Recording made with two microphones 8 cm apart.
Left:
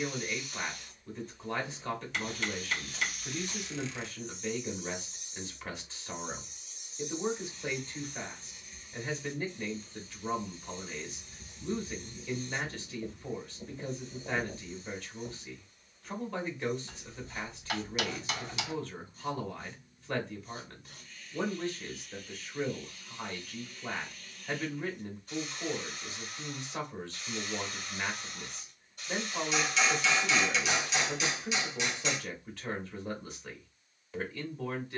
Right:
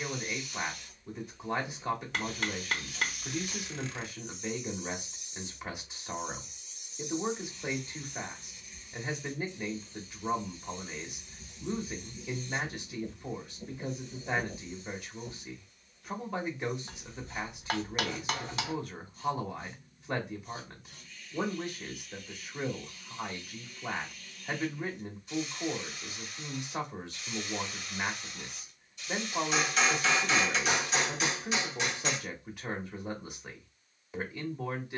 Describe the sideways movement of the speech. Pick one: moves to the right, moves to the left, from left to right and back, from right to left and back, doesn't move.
doesn't move.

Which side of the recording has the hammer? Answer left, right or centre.
right.